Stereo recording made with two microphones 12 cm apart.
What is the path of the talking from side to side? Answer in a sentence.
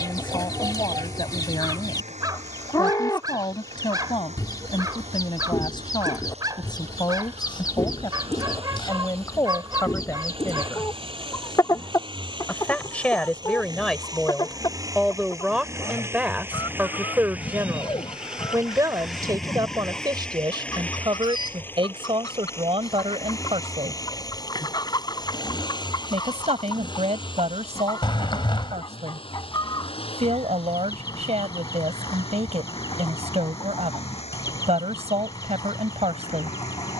In this clip you hear the talking move to the right.